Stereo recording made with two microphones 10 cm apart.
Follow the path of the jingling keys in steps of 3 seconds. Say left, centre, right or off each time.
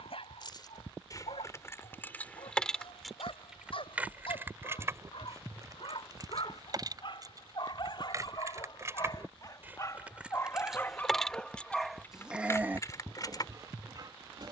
left, right, right, centre, left.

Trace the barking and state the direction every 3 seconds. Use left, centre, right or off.
left, left, left, left, right.